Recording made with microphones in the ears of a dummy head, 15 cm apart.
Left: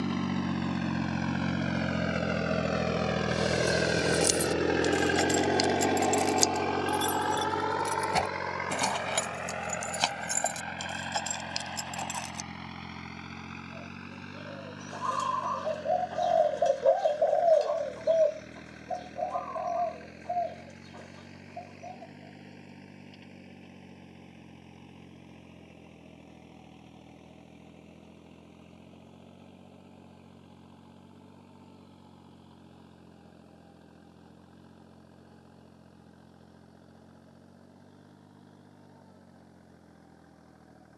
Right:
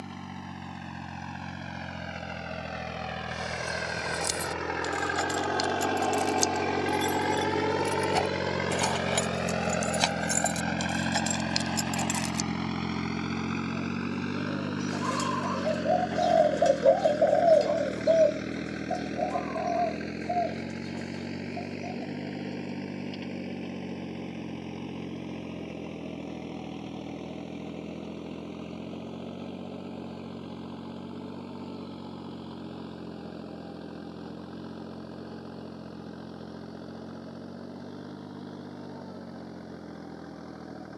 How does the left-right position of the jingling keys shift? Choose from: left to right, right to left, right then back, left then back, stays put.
left to right.